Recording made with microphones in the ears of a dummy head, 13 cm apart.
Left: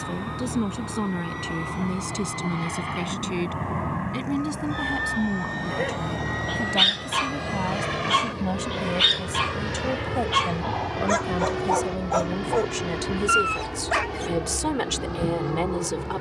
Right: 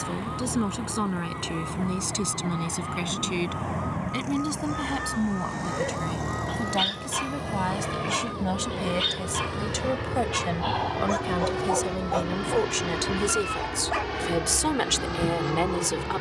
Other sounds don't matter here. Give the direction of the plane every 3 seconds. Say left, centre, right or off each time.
left, left, left, centre, right, right.